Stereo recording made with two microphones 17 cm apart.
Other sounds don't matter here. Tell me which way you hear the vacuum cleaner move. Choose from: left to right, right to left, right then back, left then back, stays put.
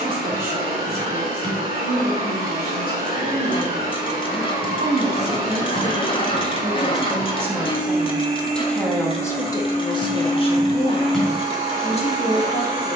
stays put.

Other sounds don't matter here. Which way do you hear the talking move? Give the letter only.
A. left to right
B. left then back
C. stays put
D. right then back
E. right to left
E.